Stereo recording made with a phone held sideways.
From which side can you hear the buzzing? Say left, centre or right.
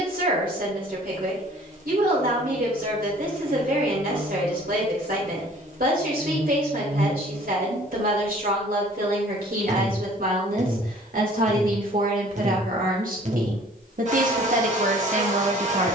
right.